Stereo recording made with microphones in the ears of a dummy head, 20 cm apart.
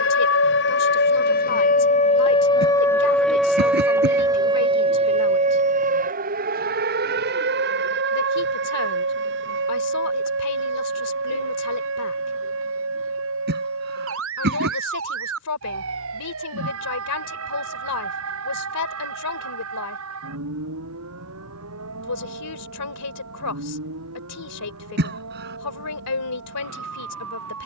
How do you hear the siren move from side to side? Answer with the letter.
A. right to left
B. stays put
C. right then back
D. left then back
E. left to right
E.